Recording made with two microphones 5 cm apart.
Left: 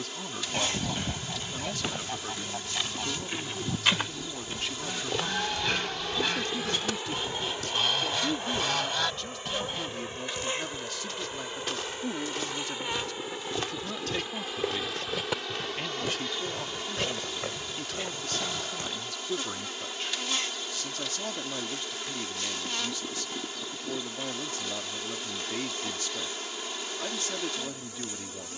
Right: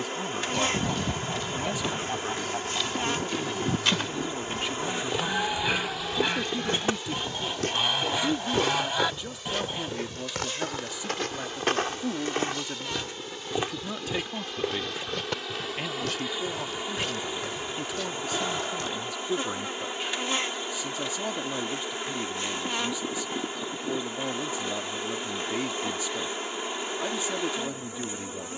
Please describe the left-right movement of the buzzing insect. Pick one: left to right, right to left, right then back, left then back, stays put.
left then back.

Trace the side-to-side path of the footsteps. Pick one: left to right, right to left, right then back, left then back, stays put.
right then back.